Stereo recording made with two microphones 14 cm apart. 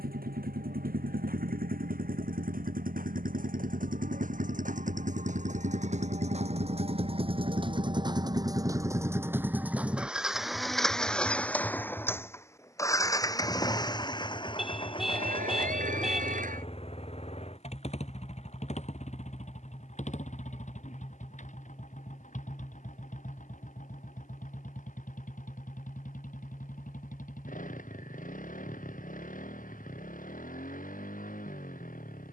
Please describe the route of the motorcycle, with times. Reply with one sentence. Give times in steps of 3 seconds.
You can hear the motorcycle on the right from 0 s, in the centre from 9 s and on the left from 12 s.